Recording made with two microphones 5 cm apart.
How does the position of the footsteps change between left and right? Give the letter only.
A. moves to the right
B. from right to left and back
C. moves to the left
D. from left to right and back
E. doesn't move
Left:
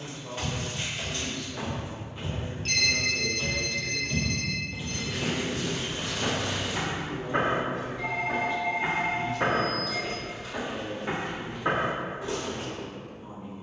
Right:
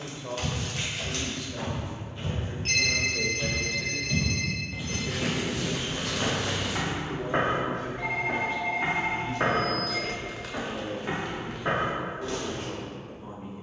D.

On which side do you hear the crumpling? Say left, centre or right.
right.